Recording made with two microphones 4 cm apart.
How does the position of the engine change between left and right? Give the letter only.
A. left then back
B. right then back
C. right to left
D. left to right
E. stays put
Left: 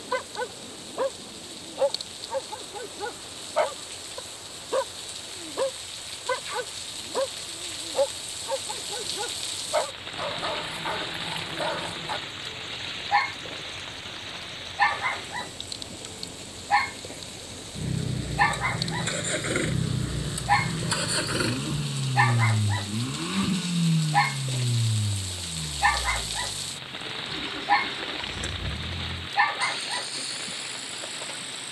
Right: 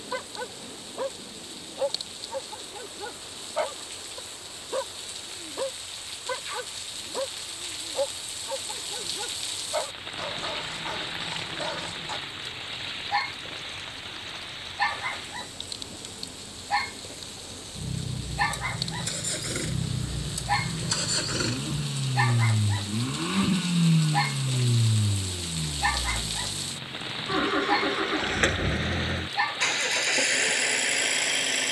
D.